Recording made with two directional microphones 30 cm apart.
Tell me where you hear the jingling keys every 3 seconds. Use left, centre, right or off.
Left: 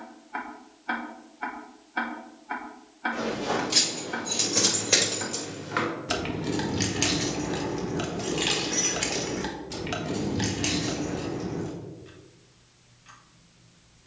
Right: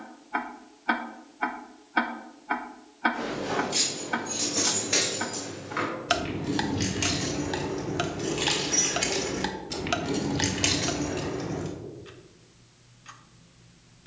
off, left, left, right, off.